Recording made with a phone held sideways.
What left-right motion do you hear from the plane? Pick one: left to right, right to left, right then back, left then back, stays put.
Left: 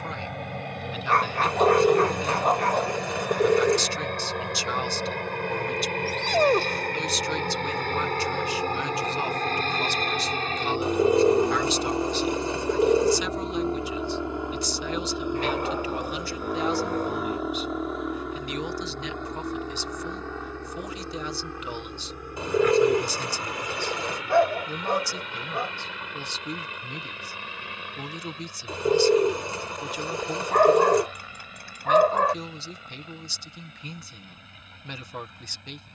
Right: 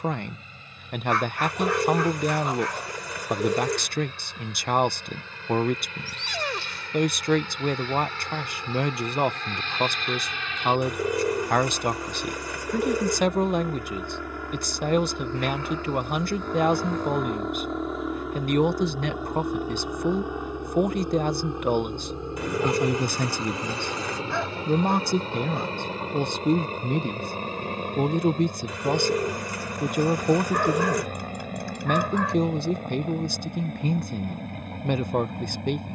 left to right.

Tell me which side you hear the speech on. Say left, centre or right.
right.